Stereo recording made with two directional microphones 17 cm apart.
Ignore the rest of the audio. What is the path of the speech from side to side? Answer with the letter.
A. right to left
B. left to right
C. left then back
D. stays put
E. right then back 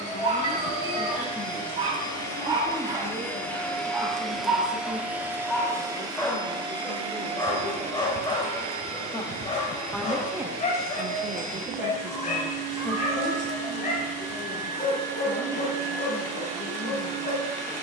E.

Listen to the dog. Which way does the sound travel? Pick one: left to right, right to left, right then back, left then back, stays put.
right to left.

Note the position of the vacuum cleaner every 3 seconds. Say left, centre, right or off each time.
left, centre, right, right, right, right.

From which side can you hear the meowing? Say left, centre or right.
right.